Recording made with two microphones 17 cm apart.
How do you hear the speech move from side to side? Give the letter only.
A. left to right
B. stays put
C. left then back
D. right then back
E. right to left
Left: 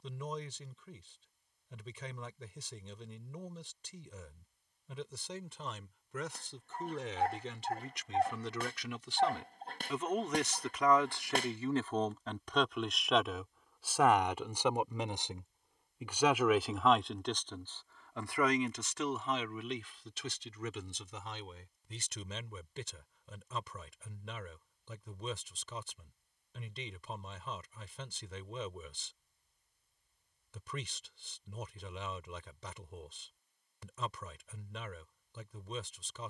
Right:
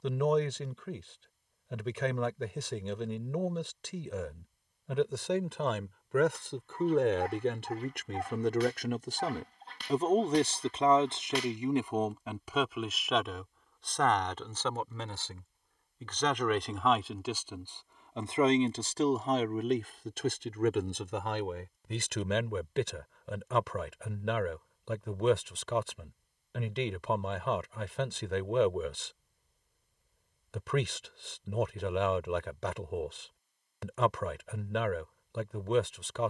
C.